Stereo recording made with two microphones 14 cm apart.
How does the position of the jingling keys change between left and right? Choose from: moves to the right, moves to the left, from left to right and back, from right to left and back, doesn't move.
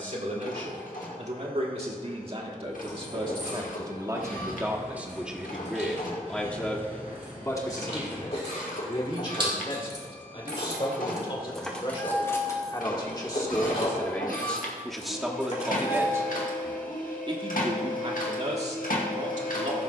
moves to the left.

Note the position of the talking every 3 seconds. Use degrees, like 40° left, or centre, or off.
50° right, 20° right, 20° left, 40° left, 20° left, 20° right, 50° right.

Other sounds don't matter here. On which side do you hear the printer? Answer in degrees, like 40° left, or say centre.
80° left.